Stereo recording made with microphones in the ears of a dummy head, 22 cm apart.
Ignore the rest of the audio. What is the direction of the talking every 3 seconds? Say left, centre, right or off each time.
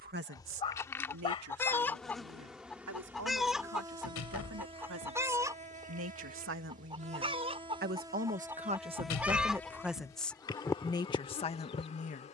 right, right, right, centre.